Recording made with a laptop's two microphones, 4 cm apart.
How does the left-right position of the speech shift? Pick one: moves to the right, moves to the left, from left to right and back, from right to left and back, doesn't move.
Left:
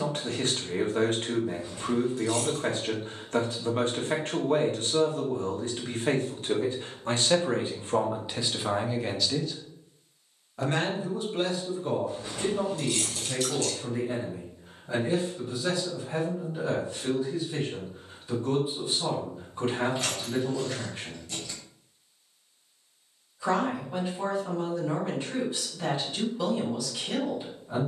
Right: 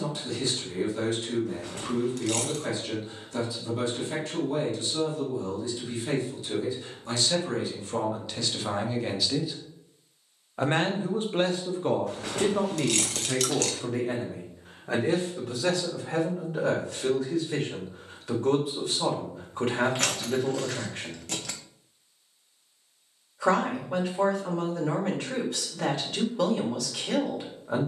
moves to the right.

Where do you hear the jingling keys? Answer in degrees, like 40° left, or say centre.
70° right.